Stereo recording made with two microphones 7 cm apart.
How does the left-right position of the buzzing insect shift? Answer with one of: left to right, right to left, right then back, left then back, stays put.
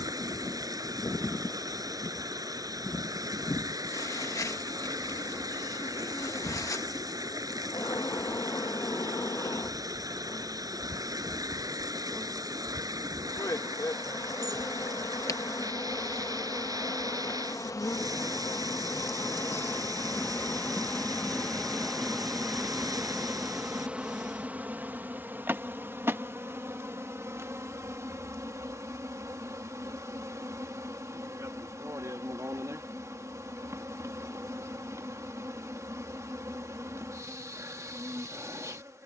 left to right.